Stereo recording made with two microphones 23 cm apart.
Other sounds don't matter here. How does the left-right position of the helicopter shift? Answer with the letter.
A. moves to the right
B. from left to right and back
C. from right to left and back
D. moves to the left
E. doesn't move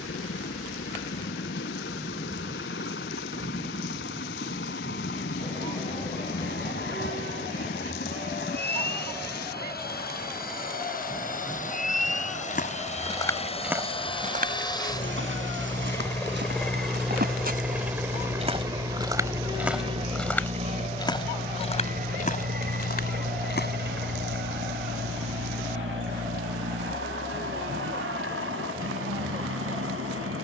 A.